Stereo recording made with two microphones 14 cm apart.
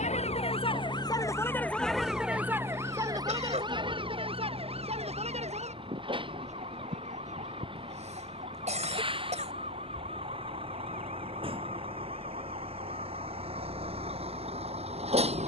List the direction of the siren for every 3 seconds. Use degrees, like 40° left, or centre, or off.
20° left, 40° right, 50° right, 60° right, 60° right.